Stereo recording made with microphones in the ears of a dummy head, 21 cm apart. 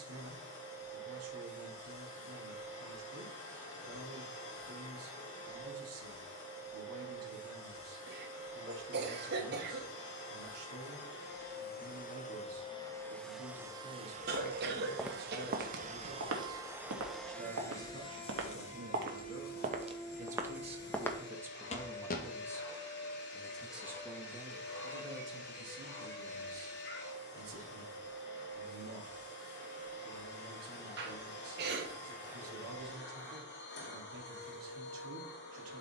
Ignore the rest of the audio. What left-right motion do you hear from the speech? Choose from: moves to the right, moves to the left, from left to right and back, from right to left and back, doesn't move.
from right to left and back.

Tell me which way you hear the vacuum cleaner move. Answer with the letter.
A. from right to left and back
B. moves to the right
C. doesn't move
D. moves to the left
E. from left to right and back
E.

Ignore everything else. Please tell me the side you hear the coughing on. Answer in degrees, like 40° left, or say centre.
40° right.